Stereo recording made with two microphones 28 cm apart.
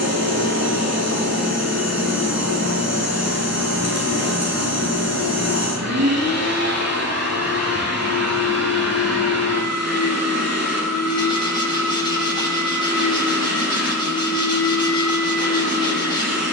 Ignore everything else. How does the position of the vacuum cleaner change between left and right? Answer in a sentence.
You can hear the vacuum cleaner stay put.